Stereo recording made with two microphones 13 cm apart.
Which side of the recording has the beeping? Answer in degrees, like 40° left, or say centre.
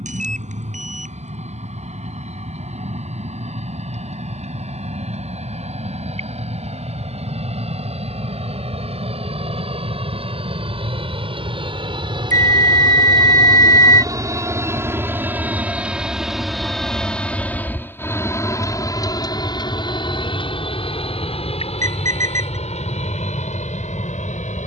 70° right.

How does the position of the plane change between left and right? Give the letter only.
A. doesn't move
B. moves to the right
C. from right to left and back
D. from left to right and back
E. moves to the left
E.